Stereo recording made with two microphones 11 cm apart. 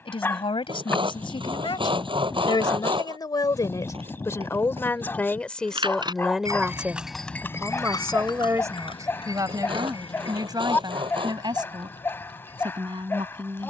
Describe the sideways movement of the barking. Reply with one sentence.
You can hear the barking stay put.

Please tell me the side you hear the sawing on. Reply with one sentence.
In this clip you hear the sawing on the right.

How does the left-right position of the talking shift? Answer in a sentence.
You can hear the talking travel towards the right.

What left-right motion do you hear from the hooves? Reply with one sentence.
You can hear the hooves move from right to left.